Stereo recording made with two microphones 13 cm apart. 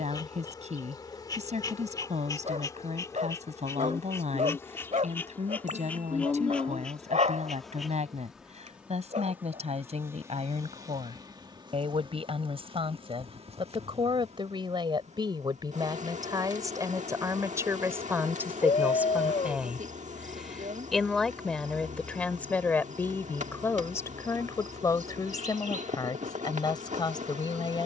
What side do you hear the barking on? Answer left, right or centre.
right.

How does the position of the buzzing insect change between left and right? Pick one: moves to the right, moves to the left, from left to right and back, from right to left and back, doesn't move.
moves to the right.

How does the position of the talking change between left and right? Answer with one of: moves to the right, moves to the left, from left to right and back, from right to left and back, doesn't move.
moves to the left.